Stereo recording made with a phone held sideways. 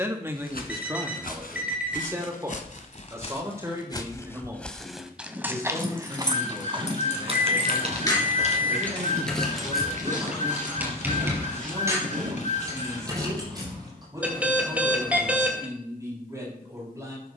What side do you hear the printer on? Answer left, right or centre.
left.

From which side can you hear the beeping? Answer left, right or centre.
centre.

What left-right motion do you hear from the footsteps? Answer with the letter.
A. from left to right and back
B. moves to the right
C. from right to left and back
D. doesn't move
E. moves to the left
B.